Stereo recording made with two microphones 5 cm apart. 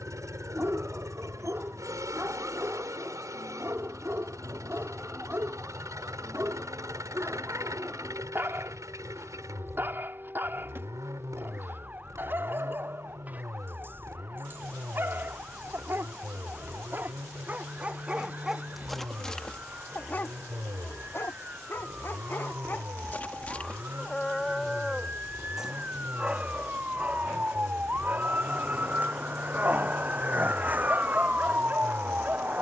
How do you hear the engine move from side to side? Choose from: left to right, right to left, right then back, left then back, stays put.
stays put.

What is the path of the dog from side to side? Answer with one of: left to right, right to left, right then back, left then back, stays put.
left then back.